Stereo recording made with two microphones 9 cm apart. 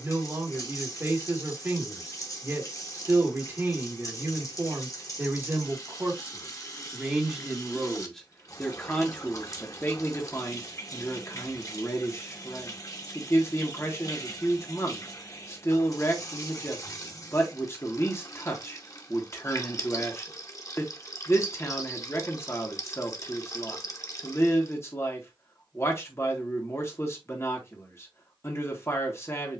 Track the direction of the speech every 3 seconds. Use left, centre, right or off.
right, right, centre, left, left, left, left, left, left, left.